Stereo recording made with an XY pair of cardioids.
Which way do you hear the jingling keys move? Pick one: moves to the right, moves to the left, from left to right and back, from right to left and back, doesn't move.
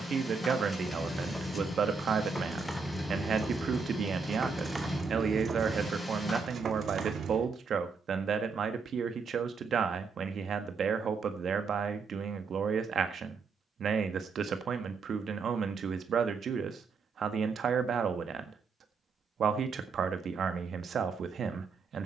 moves to the right.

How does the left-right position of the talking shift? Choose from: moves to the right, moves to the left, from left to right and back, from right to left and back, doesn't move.
doesn't move.